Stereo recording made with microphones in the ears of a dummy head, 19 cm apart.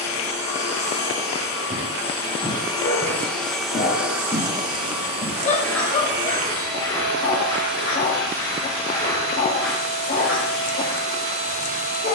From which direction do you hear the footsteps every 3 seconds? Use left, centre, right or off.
right, centre, left, centre.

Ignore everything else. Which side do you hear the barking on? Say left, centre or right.
left.